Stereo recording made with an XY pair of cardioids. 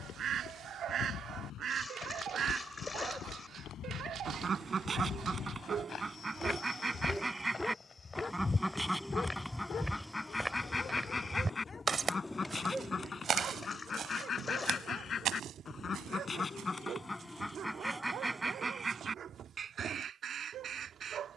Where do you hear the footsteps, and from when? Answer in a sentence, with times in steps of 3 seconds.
In this clip you hear the footsteps on the left from 0 s, in the centre from 9 s, on the right from 12 s and not at all from 18 s.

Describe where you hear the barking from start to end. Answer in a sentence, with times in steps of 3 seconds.
You can hear the barking on the right from 0 s, in the centre from 6 s, on the left from 9 s and on the right from 12 s.